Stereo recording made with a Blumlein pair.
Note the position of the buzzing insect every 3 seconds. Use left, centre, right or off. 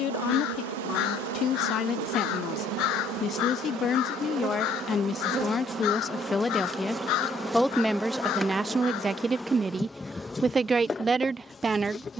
right, right, centre, centre.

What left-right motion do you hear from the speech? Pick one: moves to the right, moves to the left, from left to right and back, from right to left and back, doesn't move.
moves to the right.